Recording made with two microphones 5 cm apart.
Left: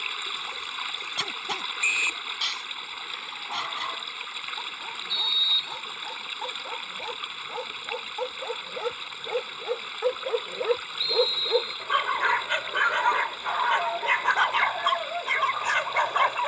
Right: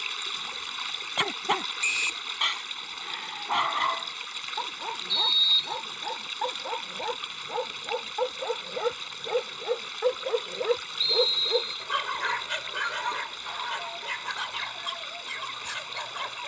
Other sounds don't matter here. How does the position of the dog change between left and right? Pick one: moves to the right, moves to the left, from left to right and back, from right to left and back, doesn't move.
moves to the left.